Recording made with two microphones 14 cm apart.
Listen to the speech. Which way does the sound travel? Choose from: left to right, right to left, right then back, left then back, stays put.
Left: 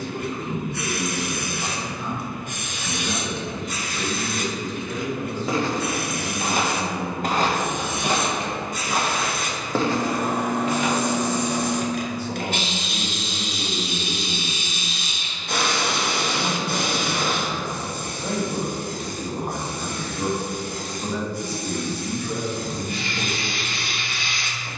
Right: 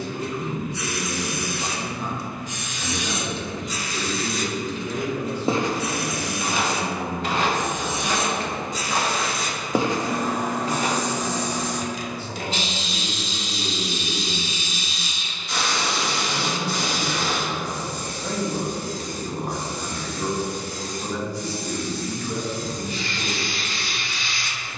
right then back.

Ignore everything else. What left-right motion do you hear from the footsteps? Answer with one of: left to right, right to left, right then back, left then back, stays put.
left then back.